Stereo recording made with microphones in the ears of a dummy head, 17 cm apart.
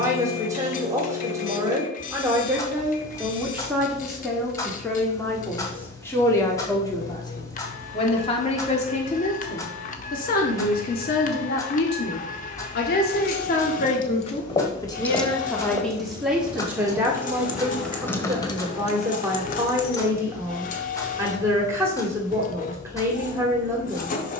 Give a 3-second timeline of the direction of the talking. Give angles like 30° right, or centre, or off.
10° right, centre, 20° left, 50° left, 40° left, centre, 10° right, 10° right.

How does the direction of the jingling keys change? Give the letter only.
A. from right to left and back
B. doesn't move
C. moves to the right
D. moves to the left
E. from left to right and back
E.